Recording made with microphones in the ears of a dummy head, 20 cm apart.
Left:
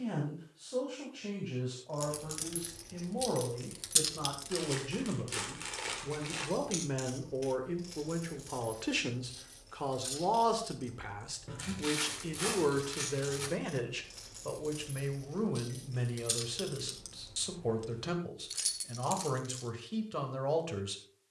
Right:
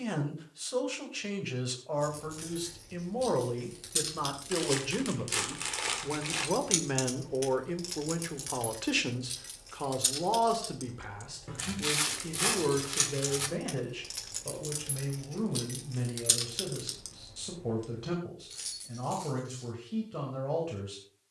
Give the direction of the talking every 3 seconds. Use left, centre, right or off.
right, right, right, centre, left, left, left.